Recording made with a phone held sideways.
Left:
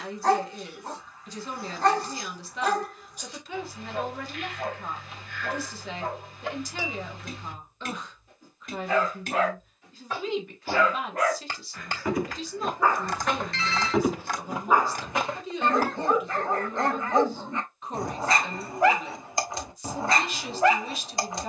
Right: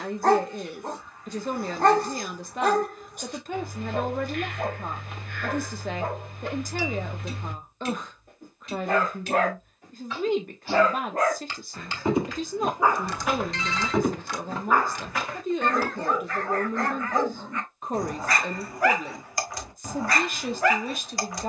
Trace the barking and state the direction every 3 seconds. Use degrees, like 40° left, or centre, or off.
50° right, 50° right, 50° right, 40° right, centre, 20° left, 20° left.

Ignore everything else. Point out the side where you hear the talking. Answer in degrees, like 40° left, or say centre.
50° right.